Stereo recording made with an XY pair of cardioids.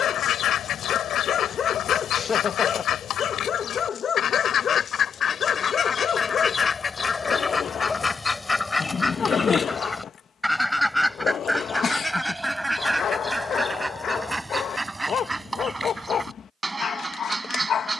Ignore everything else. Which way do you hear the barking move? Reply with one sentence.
In this clip you hear the barking stay in one place.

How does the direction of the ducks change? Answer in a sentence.
In this clip you hear the ducks move to the right.